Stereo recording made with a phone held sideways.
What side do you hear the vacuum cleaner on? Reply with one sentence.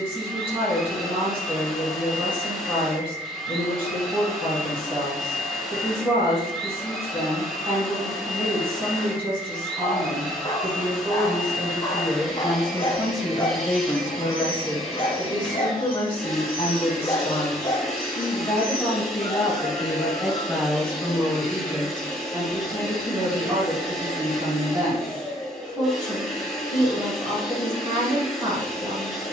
You can hear the vacuum cleaner in the centre.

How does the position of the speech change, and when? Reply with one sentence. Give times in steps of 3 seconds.
In this clip you hear the speech on the right from 0 s, in the centre from 12 s, on the left from 15 s, in the centre from 18 s and on the right from 21 s.